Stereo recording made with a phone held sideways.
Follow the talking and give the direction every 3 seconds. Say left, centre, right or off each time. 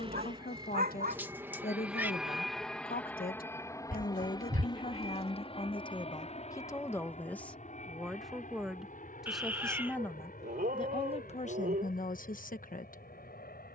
left, left, centre, left, left.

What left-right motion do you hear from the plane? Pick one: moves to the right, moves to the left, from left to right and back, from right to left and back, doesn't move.
moves to the left.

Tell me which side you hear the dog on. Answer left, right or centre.
right.